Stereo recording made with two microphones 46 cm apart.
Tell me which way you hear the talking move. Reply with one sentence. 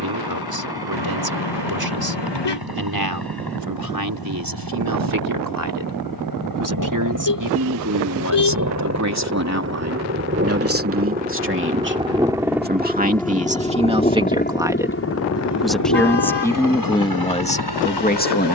You can hear the talking go from the right side to the left.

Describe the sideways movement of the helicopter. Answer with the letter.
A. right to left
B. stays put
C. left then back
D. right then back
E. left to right
A.